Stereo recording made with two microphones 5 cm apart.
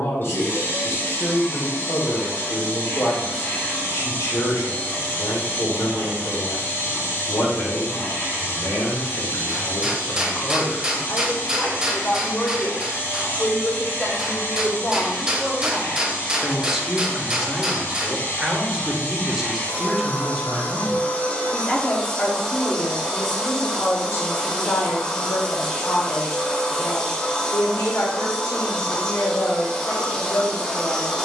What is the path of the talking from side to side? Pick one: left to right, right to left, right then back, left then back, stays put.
right then back.